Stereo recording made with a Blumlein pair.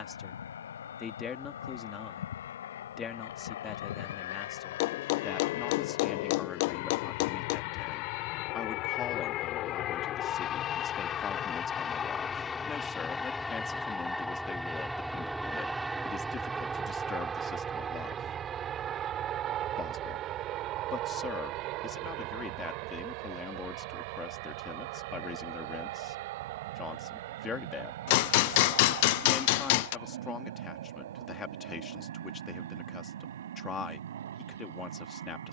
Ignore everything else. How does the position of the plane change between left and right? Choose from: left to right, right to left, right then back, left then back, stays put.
left to right.